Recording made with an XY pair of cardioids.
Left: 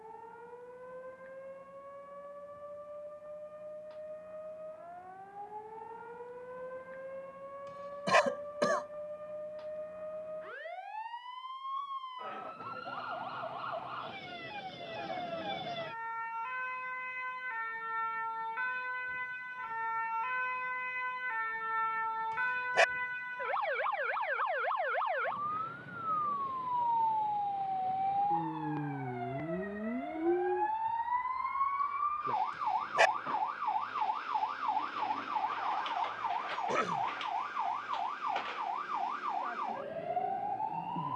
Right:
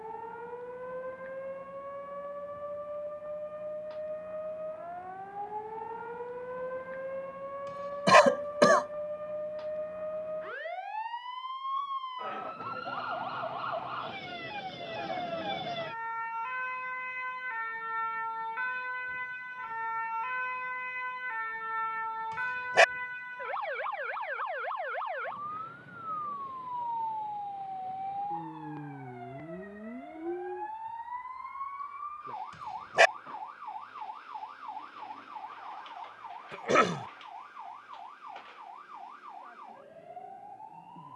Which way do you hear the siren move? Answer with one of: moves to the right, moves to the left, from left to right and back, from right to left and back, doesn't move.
moves to the left.